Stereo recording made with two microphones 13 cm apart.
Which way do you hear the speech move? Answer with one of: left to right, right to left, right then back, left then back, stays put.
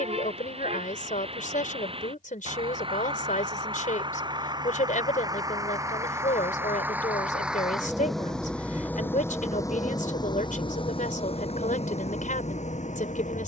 stays put.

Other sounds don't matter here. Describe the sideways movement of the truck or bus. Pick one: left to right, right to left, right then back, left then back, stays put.
right to left.